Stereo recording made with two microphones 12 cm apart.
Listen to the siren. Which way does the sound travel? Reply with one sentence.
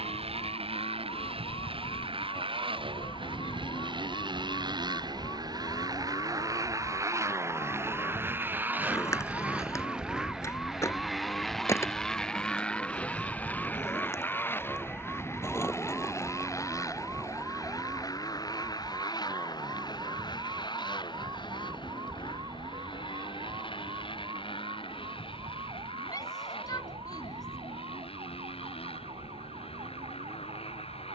In this clip you hear the siren move to the right.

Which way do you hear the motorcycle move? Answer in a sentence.
In this clip you hear the motorcycle move to the left.